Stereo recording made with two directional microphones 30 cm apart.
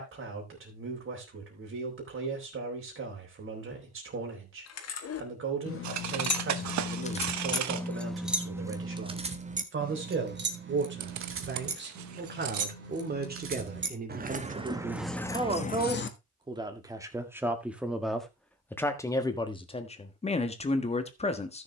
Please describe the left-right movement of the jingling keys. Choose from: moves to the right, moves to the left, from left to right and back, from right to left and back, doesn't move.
from left to right and back.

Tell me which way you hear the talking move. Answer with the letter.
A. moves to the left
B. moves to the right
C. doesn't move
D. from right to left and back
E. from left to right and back
A.